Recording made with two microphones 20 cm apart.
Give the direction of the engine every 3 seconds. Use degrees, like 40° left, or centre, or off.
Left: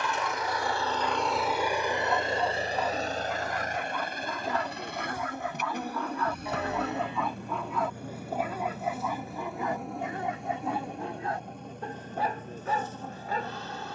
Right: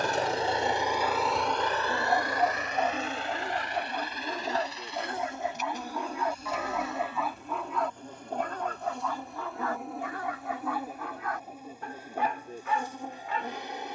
centre, 50° left, 60° left, 70° left, 70° left.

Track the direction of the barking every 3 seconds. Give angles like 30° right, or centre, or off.
40° right, 30° right, centre, 20° left, 40° left.